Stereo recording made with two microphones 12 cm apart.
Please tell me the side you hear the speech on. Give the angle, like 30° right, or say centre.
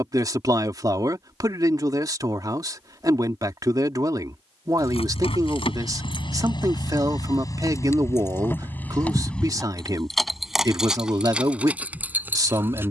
30° right.